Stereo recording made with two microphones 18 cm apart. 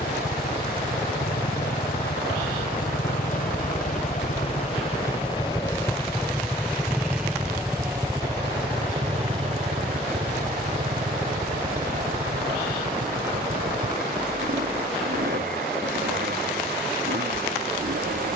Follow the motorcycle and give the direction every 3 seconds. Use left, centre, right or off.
left, left, centre, right, right, right.